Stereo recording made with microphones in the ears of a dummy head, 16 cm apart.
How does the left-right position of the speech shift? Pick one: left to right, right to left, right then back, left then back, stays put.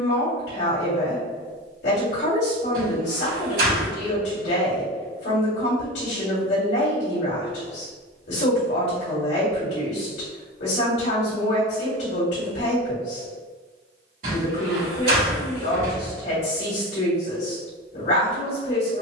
stays put.